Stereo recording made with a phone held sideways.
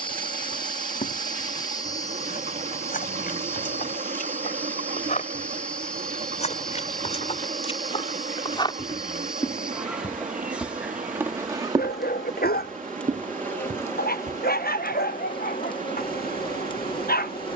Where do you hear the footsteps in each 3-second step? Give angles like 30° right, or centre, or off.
60° left, 60° left, 40° left, 10° right, 50° right, off.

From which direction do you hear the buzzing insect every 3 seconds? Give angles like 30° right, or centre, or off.
20° left, 10° left, centre, 10° right, 10° left, 30° left.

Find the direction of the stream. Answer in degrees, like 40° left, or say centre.
60° right.